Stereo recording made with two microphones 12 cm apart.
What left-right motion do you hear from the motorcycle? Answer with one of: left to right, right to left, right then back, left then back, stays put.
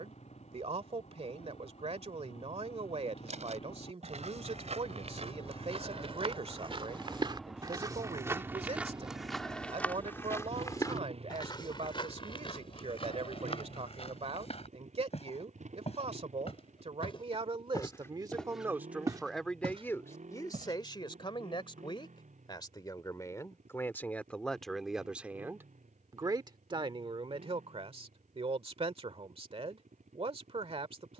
left to right.